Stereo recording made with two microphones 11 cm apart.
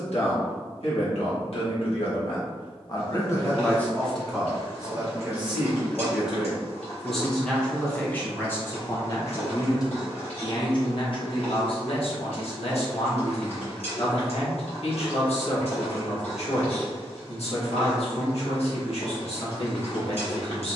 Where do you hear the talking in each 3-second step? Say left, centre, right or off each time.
left, centre, centre, left, left, left, left.